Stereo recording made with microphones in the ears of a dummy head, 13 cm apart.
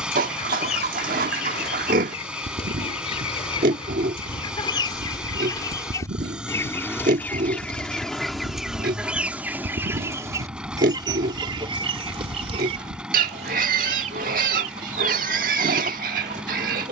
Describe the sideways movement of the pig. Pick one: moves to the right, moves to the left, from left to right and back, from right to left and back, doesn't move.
doesn't move.